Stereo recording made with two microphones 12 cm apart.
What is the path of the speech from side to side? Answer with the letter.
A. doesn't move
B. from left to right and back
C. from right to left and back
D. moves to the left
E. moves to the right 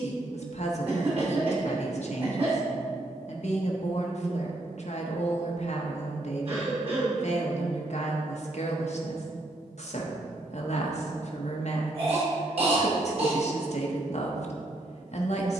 A.